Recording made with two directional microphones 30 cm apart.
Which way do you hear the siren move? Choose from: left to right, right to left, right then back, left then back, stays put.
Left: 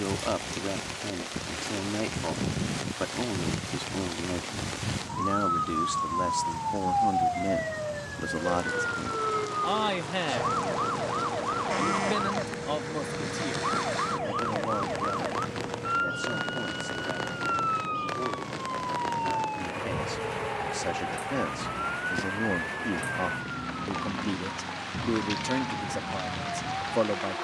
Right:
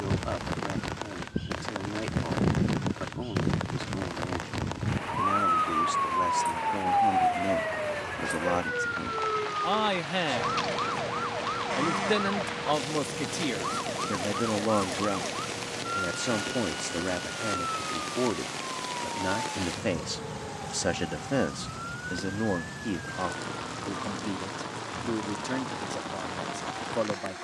right to left.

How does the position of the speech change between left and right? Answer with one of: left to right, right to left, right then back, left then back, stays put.
right then back.